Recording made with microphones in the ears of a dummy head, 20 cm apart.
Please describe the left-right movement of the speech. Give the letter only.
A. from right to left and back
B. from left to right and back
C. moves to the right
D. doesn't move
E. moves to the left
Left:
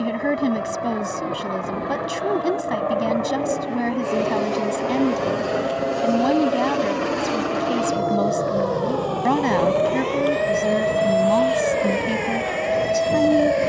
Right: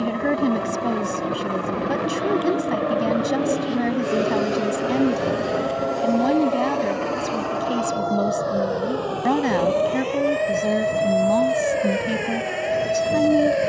D.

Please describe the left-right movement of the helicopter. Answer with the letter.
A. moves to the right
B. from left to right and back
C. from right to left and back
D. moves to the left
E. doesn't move
D.